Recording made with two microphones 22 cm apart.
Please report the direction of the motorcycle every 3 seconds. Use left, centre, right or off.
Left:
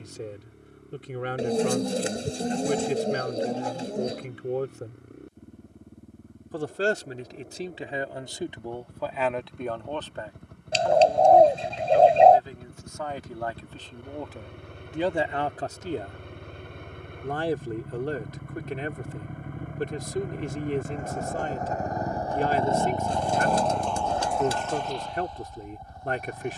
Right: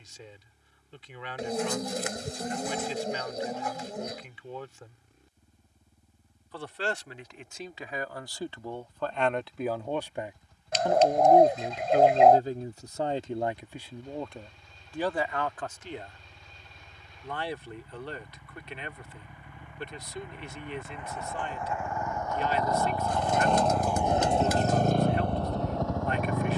left, left, left, left, left, left, left, left, right.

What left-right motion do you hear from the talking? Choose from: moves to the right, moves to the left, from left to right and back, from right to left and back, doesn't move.
from left to right and back.